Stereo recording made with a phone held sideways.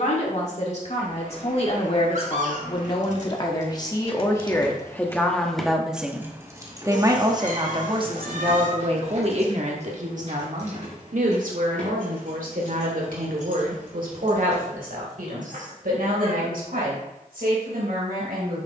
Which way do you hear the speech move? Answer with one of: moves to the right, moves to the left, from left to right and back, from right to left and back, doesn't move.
moves to the right.